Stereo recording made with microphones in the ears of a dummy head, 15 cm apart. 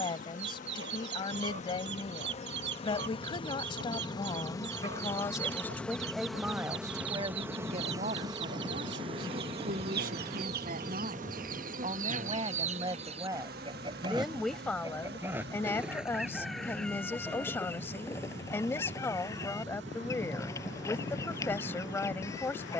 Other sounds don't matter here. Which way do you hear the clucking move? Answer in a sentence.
In this clip you hear the clucking go from the right side to the left.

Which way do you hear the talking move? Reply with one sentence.
In this clip you hear the talking go right and come back.